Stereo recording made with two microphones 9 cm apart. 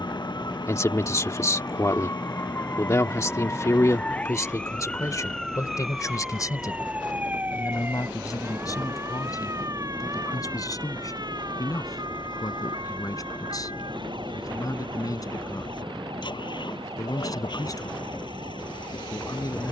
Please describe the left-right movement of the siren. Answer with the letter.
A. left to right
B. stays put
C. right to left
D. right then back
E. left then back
A.